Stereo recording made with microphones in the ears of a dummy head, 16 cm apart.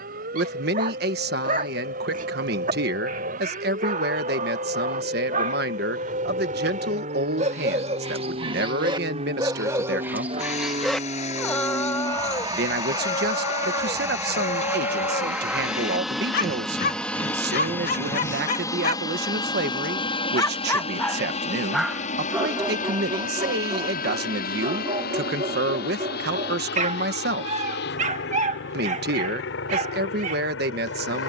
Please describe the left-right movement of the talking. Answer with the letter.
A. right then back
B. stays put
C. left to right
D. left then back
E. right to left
B.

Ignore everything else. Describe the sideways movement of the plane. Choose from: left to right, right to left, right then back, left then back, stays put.
right to left.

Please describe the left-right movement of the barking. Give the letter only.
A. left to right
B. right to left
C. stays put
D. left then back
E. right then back
D.